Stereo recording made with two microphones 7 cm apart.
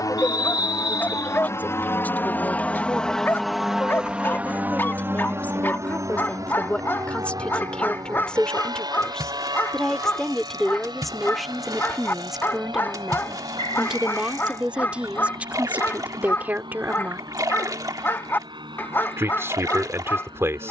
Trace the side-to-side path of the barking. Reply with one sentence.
You can hear the barking stay put.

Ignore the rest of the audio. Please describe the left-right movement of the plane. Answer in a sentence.
In this clip you hear the plane move to the right.